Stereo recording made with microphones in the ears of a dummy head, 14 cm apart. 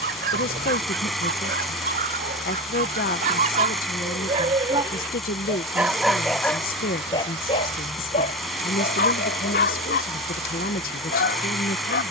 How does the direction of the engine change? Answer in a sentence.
You can hear the engine stay put.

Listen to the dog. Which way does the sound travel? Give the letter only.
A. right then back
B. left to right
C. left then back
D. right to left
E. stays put
D.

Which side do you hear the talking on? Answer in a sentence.
In this clip you hear the talking on the left.